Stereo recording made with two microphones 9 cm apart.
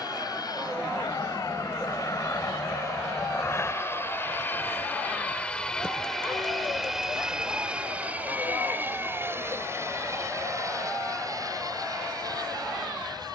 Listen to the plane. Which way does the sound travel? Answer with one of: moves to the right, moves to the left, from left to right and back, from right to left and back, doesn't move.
moves to the right.